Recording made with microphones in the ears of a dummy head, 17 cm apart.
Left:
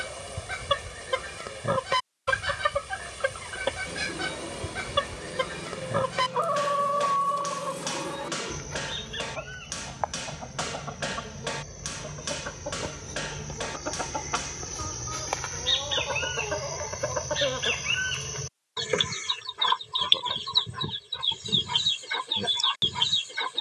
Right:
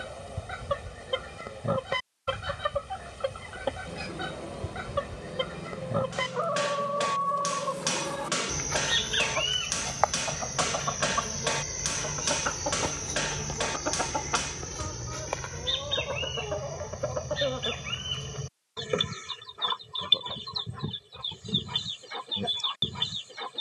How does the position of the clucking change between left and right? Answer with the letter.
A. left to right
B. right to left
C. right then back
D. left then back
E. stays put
C.